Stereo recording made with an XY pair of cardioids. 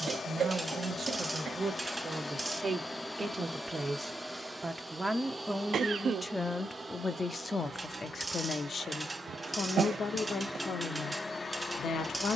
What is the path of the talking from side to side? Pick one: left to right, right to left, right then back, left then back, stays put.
right to left.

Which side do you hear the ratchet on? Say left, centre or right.
right.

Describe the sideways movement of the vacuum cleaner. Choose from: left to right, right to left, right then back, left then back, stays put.
right then back.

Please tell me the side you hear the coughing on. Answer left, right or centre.
right.